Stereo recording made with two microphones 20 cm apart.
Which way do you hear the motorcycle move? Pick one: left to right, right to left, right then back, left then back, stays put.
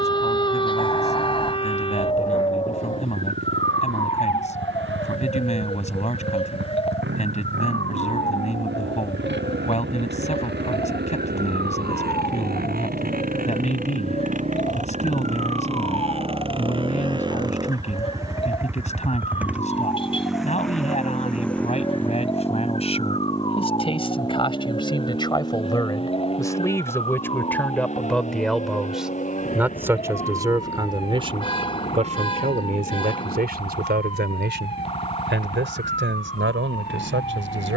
right to left.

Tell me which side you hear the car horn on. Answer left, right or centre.
left.